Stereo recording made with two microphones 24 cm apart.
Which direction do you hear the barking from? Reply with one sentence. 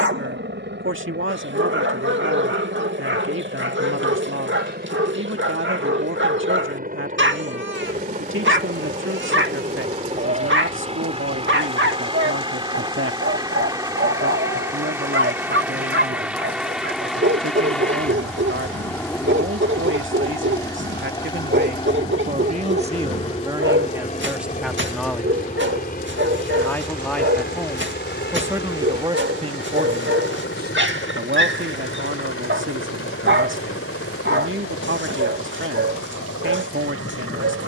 You can hear the barking on the right.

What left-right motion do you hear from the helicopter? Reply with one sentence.
In this clip you hear the helicopter go from the right side to the left.